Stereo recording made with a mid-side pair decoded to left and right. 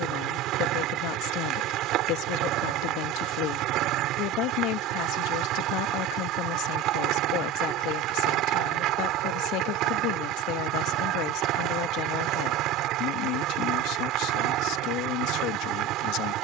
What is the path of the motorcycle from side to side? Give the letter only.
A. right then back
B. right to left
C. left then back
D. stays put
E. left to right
D.